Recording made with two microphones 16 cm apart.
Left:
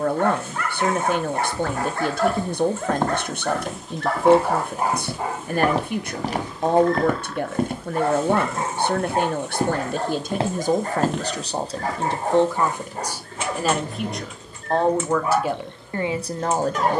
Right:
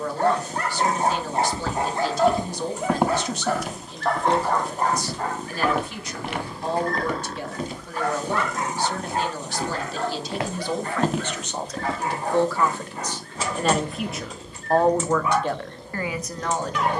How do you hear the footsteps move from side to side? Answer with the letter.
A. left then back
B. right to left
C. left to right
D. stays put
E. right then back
A.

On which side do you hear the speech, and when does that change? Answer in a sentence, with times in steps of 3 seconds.
You can hear the speech on the left from 0 s, in the centre from 12 s and on the left from 15 s.